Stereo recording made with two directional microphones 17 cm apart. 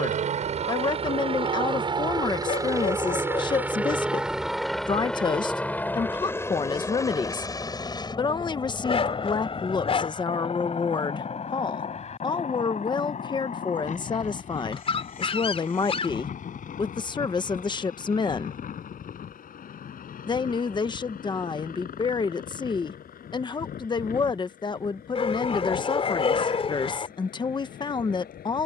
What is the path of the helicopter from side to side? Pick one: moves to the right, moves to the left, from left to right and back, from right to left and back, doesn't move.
moves to the left.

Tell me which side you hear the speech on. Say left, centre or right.
left.